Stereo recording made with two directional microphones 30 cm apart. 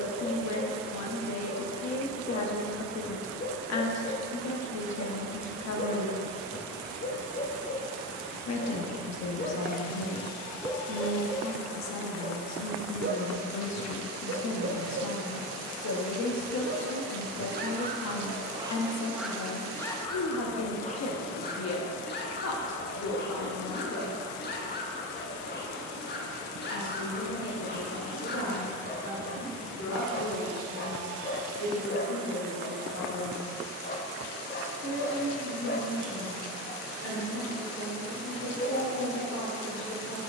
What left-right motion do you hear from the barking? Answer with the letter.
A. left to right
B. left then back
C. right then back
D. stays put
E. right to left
C.